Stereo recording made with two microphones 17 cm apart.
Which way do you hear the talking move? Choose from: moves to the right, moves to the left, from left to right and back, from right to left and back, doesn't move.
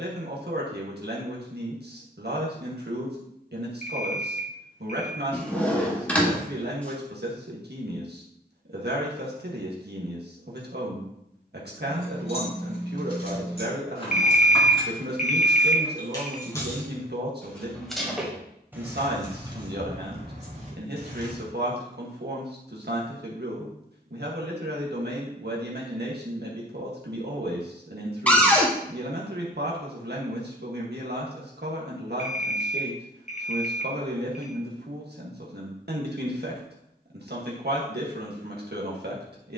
doesn't move.